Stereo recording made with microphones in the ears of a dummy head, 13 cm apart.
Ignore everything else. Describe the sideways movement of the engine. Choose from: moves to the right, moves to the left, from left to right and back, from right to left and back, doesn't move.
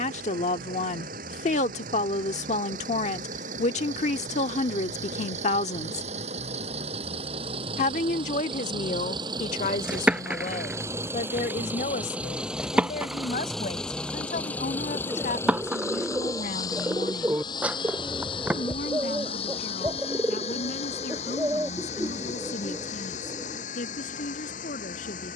moves to the left.